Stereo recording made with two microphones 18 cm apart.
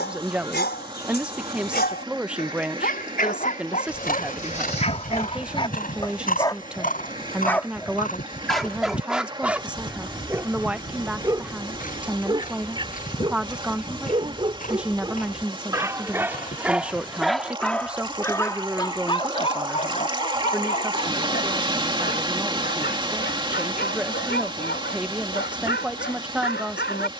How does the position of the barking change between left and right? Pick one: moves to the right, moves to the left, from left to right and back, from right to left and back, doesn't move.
from left to right and back.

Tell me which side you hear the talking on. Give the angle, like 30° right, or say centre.
10° right.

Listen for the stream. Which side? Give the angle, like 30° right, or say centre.
30° right.